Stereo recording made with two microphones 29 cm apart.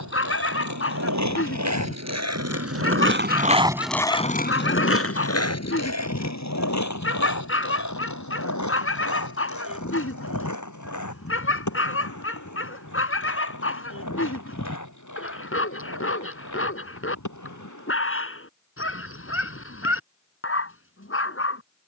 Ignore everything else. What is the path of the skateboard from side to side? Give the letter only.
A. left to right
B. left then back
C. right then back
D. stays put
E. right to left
E.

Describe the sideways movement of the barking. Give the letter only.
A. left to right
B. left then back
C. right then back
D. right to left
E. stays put
E.